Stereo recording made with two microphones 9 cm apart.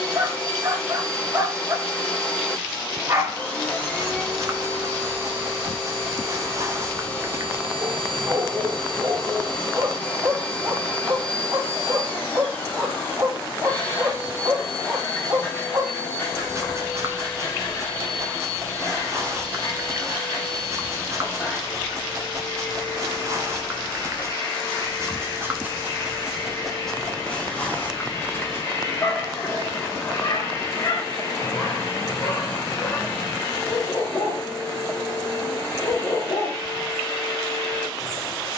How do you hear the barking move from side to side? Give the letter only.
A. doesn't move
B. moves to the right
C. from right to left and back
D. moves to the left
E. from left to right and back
D.